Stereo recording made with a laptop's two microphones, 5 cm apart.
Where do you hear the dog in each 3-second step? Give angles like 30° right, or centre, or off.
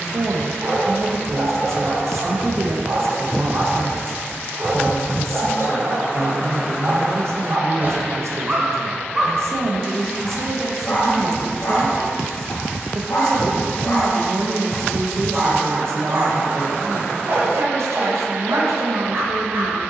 60° right, 60° right, 40° right, 30° left, 40° left, 50° right, 60° right.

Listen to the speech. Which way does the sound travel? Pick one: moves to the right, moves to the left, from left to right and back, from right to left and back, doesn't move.
doesn't move.